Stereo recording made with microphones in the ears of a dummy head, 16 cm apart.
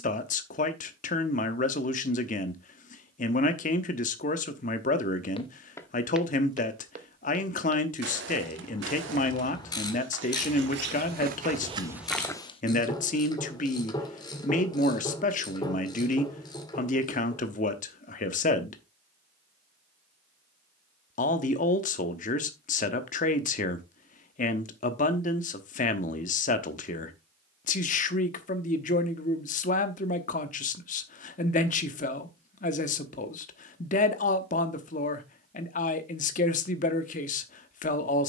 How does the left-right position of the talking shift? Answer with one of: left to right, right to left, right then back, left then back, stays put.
stays put.